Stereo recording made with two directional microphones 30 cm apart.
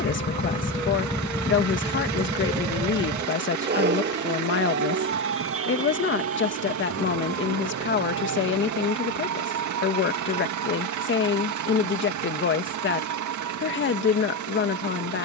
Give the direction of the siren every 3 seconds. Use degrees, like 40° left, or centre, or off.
centre, 40° right, 50° right, 60° right, 60° right.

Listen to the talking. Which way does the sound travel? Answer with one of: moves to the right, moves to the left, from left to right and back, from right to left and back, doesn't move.
doesn't move.